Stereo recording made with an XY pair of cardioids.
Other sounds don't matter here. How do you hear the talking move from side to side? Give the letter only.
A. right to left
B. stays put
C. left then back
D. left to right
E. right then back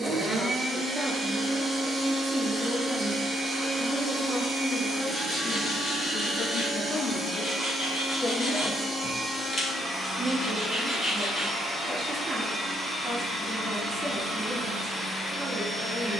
C.